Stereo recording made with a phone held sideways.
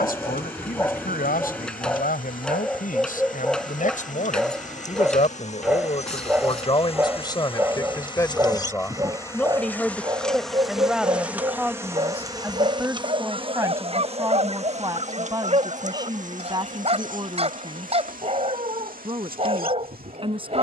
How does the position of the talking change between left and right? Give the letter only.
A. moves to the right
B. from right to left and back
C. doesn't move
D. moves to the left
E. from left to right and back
A.